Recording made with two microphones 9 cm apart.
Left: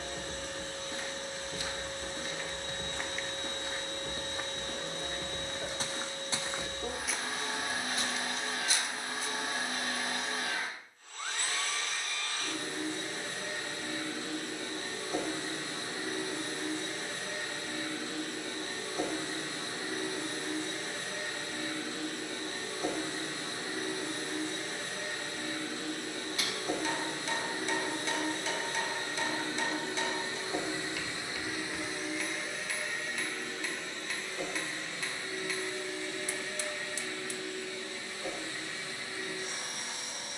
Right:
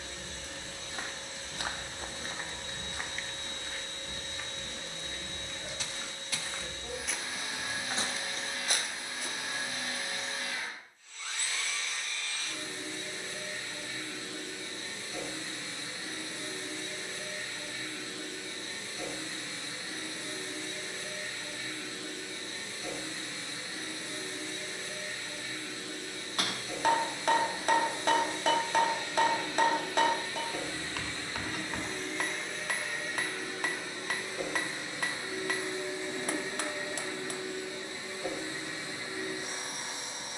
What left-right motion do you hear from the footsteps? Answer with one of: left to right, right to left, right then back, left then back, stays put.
left then back.